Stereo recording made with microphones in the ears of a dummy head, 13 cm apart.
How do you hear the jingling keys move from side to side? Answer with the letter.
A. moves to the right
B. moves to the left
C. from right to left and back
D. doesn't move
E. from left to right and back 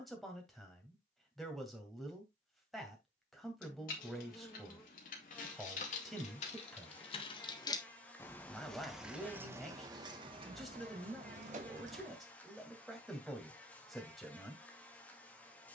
A.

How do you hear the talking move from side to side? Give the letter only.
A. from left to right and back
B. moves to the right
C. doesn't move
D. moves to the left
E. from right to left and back
C.